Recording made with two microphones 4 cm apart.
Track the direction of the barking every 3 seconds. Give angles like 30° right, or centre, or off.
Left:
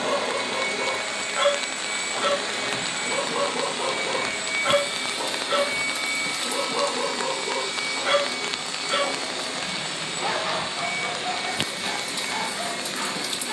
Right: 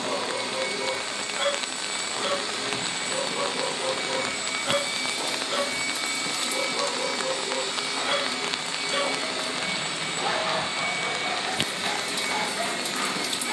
60° left, 60° left, 50° left, centre, 10° right.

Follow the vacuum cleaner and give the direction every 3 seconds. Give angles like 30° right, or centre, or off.
50° left, 30° left, centre, 30° right, 40° right.